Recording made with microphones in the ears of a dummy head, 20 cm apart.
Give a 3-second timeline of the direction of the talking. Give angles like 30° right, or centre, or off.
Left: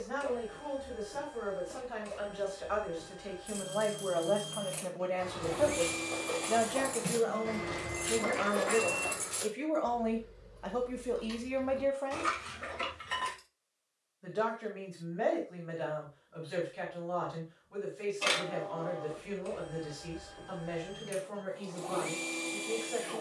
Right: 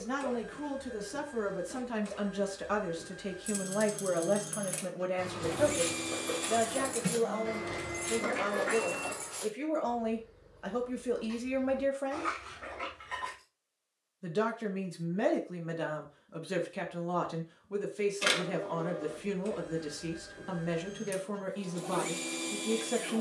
70° right, 30° right, 10° left, 10° right, 40° right, 60° right, 70° right, 70° right.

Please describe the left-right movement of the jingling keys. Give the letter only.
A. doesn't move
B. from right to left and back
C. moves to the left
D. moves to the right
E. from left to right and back
C.